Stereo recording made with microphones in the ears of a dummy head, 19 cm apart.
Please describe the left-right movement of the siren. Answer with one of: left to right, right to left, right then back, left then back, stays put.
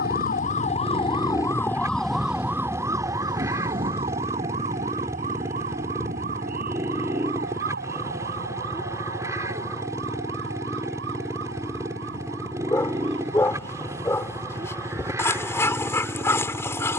left to right.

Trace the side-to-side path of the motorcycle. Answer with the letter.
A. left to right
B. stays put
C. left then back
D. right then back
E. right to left
B.